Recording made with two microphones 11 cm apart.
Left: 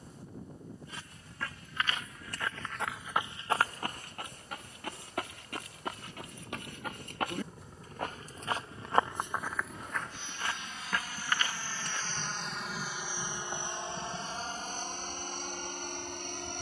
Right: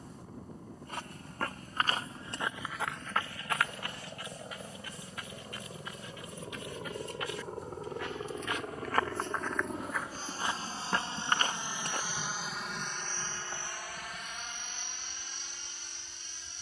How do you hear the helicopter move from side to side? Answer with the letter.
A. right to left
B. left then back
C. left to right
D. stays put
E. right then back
A.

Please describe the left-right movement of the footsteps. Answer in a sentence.
In this clip you hear the footsteps move from right to left and back again.